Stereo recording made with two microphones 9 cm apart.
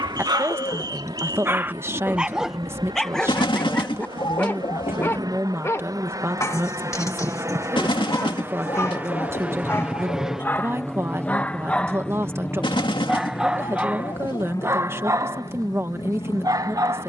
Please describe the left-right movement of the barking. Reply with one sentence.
In this clip you hear the barking move from right to left and back again.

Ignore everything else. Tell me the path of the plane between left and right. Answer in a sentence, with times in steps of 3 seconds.
You can hear the plane on the right from 0 s, in the centre from 9 s and on the left from 12 s.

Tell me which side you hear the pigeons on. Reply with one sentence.
In this clip you hear the pigeons on the left.